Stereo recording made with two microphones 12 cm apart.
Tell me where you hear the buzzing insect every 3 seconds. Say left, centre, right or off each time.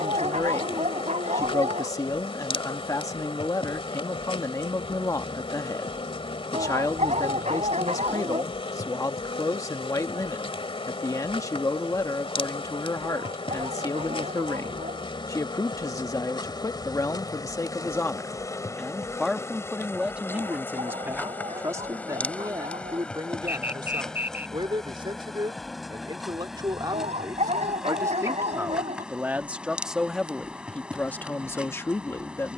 left, left, left, left, left, left, left, centre, centre, centre, centre.